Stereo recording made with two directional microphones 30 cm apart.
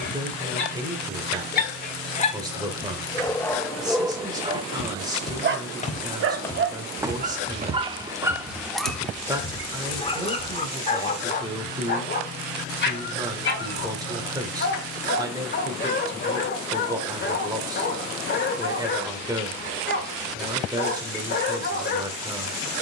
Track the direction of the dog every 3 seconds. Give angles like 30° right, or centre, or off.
30° left, 10° right, 20° right, 20° left, 40° left, 40° left, 40° left, 40° left.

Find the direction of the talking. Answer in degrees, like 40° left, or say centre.
10° right.